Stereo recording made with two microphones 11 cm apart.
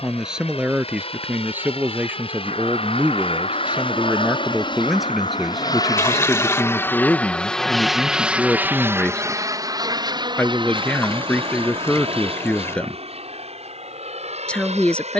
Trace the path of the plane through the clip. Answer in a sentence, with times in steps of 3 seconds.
In this clip you hear the plane on the left from 0 s, in the centre from 6 s and on the right from 9 s.